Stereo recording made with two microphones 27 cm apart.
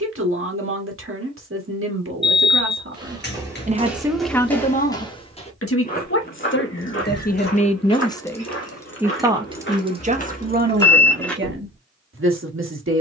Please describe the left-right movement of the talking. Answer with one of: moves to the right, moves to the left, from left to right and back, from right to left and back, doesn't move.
from right to left and back.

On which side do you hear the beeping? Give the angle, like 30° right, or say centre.
40° left.